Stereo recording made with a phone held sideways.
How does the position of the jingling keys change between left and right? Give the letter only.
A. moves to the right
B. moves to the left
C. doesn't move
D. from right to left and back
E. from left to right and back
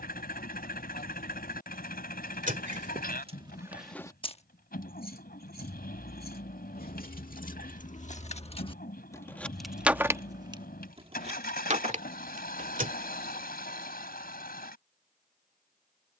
D.